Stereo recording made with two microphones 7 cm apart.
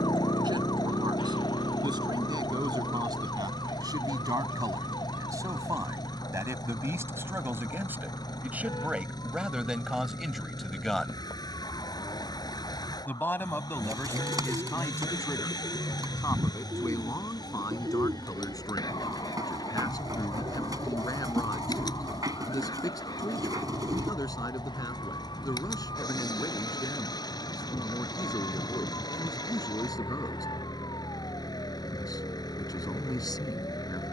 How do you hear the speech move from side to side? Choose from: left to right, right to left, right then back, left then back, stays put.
right to left.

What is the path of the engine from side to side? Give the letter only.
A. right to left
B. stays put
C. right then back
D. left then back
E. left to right
B.